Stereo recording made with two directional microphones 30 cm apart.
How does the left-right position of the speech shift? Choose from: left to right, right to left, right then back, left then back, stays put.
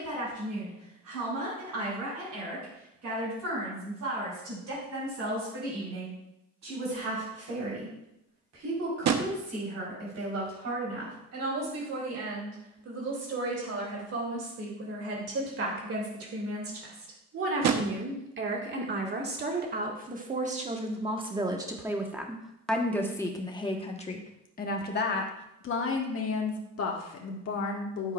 right to left.